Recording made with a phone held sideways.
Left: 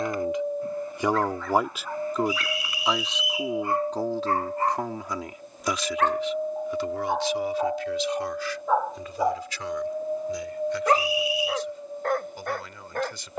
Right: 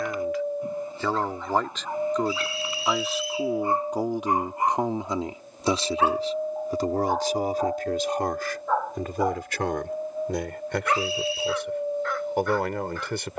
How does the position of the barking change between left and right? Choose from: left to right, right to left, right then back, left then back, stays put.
right to left.